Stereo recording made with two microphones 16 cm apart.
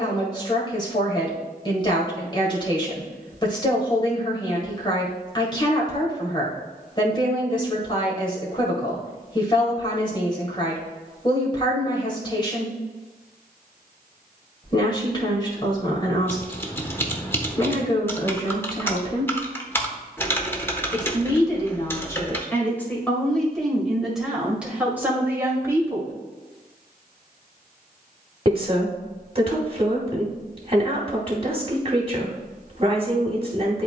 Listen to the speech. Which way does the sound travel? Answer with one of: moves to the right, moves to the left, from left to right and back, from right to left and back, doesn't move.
moves to the right.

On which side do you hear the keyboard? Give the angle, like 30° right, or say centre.
10° left.